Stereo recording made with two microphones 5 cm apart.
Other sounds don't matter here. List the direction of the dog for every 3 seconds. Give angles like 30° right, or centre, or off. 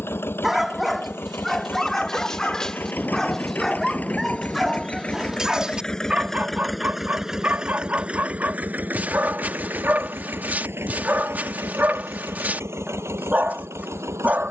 centre, centre, 30° right, 40° right, 40° right.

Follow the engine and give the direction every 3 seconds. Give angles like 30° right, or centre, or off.
50° left, 30° left, 10° right, 50° right, 70° right.